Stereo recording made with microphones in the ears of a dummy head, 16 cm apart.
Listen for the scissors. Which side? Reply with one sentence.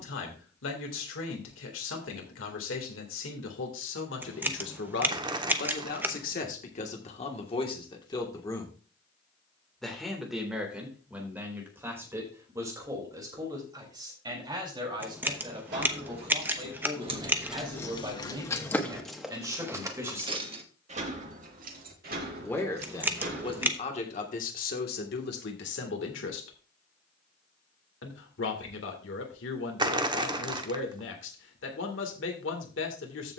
You can hear the scissors in the centre.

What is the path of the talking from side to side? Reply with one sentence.
In this clip you hear the talking move from left to right and back again.